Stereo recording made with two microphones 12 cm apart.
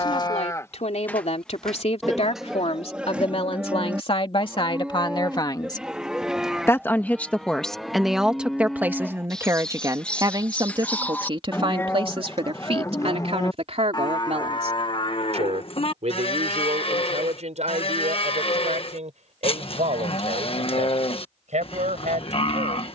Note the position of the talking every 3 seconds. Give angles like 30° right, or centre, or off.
60° left, 50° left, centre, 30° right, 60° right, 70° right, 70° right, 70° right.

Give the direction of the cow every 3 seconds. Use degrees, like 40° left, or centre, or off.
10° left, 10° right, centre, 10° left, 30° left, 50° left, 50° left, 50° left.